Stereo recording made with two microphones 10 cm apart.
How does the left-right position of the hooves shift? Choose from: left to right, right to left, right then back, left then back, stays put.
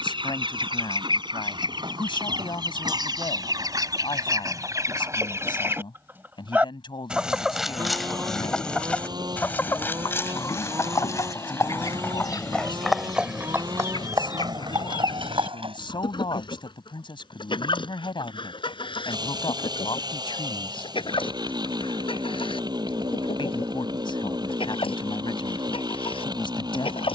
left to right.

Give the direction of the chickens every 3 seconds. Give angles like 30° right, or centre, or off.
60° right, 40° right, centre, 30° left, 50° left, 60° left, 60° left, 70° left, 70° left.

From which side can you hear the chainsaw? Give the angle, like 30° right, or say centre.
50° right.